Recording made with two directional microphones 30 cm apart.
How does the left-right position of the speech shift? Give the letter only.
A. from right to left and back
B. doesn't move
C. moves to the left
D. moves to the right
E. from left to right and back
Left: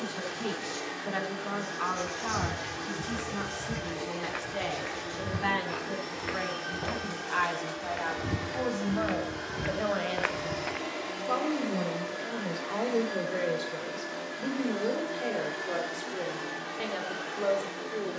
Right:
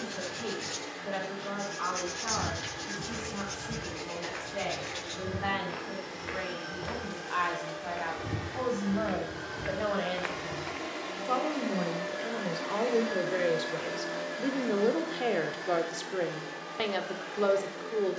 D.